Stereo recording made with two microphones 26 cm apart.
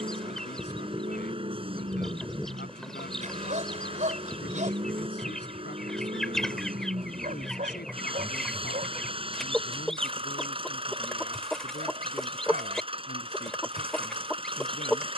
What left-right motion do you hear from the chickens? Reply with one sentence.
You can hear the chickens stay put.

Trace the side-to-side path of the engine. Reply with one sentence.
In this clip you hear the engine stay put.